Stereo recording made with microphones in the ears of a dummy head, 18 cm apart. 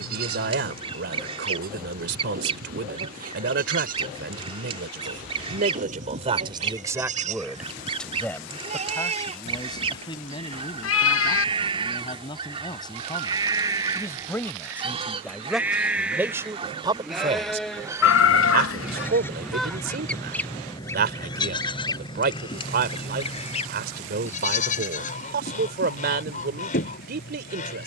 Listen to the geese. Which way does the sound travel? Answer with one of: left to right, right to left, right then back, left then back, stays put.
right to left.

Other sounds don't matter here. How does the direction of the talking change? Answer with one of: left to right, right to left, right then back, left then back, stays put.
left then back.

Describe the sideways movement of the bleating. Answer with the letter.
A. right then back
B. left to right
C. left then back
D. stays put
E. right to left
E.